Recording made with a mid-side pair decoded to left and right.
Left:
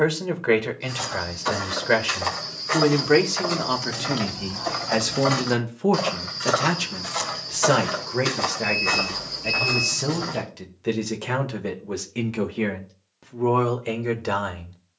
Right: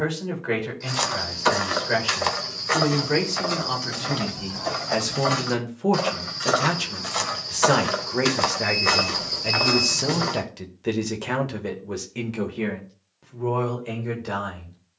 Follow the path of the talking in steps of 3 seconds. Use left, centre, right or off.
left, left, centre, centre, left.